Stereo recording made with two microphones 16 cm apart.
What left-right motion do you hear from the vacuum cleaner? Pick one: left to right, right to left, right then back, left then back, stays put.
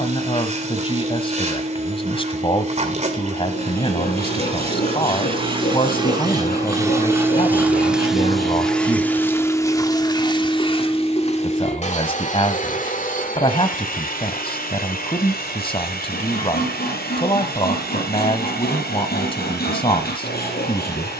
right to left.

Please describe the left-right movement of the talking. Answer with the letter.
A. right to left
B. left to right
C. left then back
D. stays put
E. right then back
D.